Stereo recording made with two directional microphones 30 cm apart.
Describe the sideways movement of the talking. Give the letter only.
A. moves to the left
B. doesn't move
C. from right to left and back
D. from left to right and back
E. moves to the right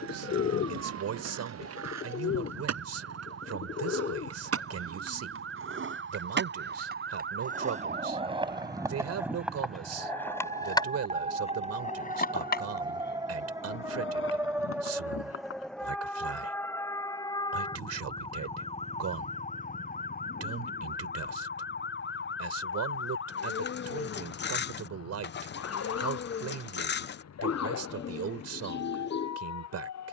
B.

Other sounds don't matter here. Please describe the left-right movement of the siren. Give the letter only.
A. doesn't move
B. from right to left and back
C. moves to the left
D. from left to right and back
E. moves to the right
C.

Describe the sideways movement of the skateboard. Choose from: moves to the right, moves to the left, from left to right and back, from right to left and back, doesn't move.
moves to the left.